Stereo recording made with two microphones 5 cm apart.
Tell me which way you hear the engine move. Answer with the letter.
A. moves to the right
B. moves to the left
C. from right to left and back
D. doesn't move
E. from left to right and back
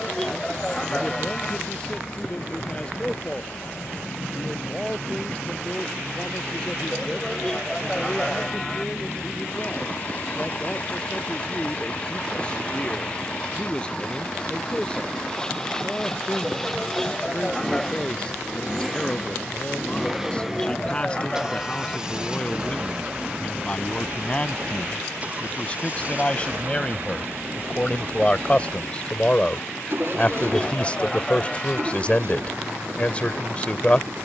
A.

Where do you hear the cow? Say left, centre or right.
centre.